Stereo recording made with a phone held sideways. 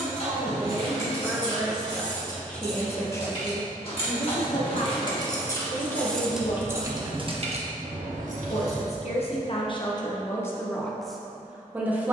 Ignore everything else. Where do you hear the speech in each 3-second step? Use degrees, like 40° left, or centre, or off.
10° right, 40° left, 60° left, 20° left.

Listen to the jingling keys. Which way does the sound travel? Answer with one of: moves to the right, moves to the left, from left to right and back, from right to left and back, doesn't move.
moves to the right.